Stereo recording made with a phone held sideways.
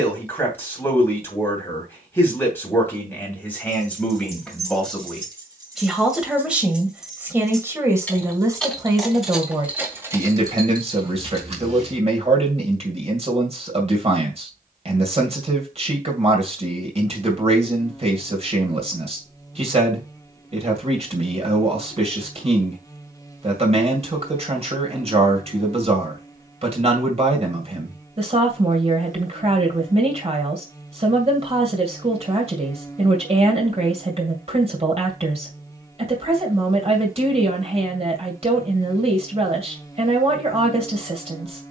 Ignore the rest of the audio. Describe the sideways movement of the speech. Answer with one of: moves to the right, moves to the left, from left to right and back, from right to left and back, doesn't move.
moves to the right.